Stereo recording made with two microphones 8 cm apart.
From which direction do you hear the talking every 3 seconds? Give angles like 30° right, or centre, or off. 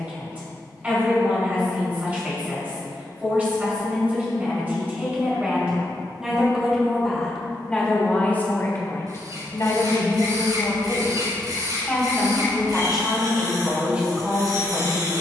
20° right, 20° right, 10° left, 40° left, 10° right.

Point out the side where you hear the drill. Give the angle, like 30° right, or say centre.
60° right.